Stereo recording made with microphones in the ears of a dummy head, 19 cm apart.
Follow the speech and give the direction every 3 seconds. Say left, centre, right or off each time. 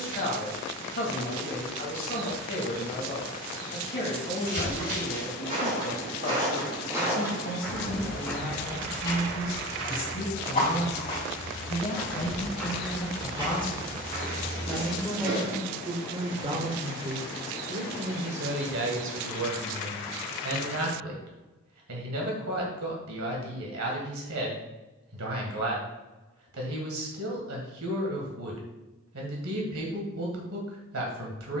left, left, left, left, left, right, right, right, right, right, right.